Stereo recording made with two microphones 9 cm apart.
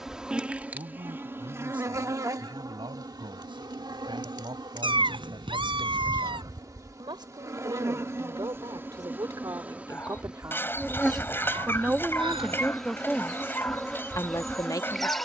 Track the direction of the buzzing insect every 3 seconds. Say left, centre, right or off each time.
right, right, right, centre, centre.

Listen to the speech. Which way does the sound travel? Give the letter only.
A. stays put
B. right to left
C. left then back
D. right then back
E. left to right
B.